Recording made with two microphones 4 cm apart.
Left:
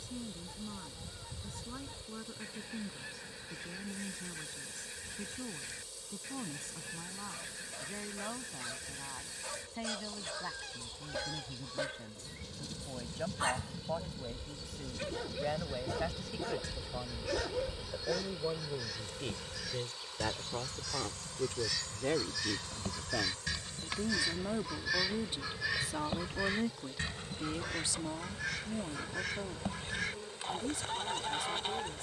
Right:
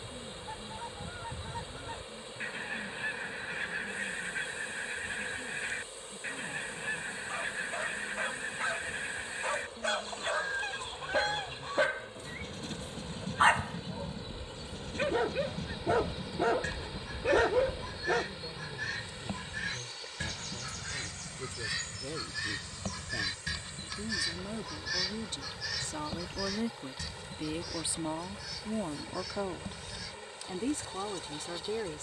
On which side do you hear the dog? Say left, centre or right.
right.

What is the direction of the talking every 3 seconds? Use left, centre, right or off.
left, left, left, left, left, left, left, left, centre, right, right.